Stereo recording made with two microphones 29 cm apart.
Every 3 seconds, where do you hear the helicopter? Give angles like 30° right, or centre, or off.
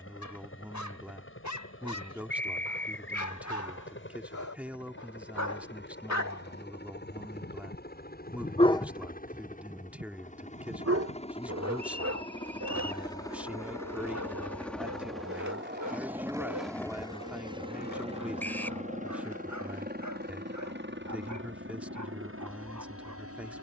50° left, 40° left, 40° left, 30° left, 10° left, 10° right, 30° right, 50° right.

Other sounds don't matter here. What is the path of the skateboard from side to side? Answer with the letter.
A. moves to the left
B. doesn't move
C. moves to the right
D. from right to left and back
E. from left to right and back
A.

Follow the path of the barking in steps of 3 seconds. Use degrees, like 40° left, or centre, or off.
80° left, 80° left, 40° left, 50° right, 70° right, 80° right, 80° right, 80° right.